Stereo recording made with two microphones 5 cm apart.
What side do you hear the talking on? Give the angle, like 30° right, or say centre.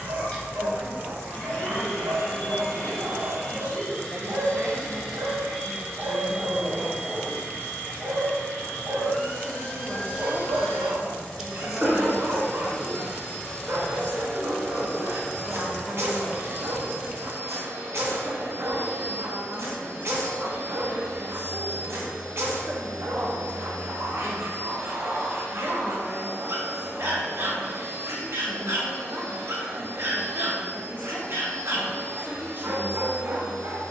40° right.